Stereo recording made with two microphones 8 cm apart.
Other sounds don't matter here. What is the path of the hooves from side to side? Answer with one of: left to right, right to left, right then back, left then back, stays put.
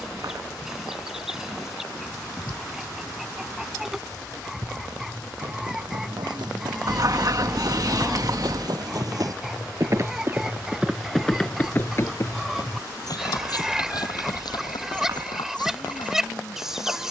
right to left.